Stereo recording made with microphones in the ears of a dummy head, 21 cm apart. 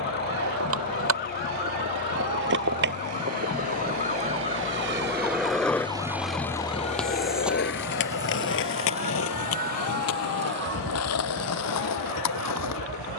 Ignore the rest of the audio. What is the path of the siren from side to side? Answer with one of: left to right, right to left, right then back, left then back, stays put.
left to right.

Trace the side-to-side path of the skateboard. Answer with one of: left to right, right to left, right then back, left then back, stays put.
right to left.